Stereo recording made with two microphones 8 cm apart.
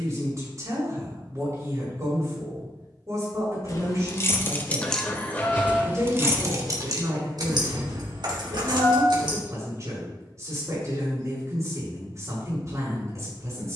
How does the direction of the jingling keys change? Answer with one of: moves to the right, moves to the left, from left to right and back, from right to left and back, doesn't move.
moves to the right.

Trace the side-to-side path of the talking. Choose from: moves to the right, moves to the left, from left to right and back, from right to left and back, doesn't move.
doesn't move.